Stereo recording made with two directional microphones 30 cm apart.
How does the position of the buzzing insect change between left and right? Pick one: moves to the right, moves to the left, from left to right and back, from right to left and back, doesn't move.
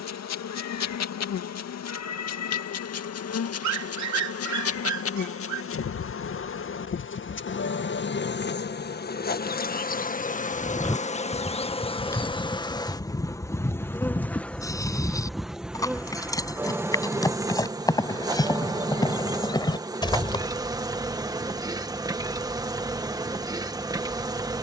moves to the right.